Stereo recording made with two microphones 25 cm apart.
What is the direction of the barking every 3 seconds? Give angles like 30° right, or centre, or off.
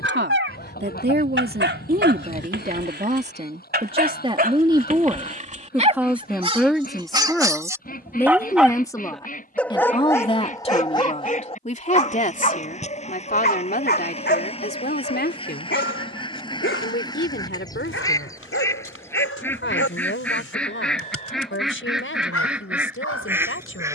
50° right, 30° right, 10° right, 10° left, 40° left, 50° left, 60° left, 70° left.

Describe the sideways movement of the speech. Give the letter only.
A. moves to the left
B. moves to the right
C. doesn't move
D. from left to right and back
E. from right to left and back
A.